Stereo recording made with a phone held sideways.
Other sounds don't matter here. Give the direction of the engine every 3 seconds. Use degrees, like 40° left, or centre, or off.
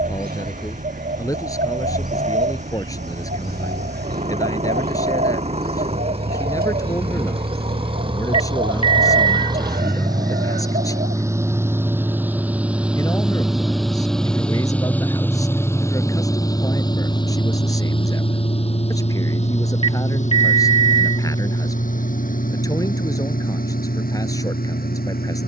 50° right, 40° right, 40° right, 20° right, centre, 20° left, 40° left, 60° left, 70° left.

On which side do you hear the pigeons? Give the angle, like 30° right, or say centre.
80° right.